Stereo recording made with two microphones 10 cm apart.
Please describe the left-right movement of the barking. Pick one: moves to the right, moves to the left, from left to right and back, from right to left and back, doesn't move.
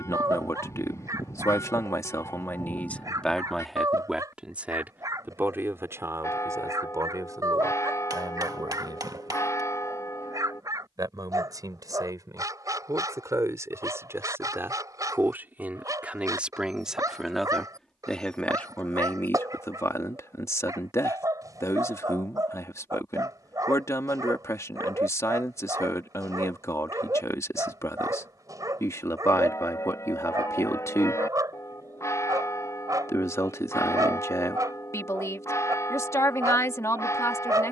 doesn't move.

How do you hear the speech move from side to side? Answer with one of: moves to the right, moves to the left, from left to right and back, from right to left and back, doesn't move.
from left to right and back.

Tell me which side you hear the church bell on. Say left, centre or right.
left.